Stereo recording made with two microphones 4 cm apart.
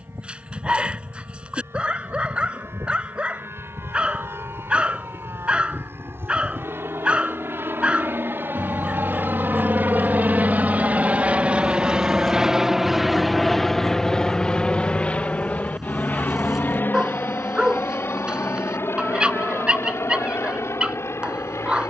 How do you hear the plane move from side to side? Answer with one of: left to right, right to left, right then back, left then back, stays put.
right to left.